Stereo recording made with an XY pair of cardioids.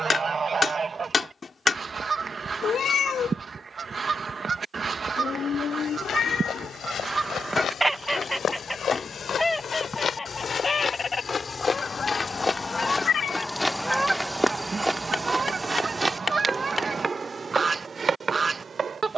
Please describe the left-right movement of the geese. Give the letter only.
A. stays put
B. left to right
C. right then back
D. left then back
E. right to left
D.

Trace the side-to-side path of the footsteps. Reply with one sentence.
You can hear the footsteps move to the right.